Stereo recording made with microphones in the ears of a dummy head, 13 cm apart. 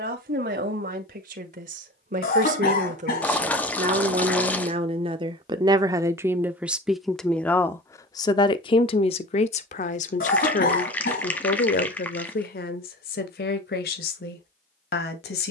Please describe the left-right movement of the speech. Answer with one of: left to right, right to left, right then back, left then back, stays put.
right to left.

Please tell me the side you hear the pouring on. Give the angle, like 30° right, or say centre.
10° left.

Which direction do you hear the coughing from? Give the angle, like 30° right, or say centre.
70° left.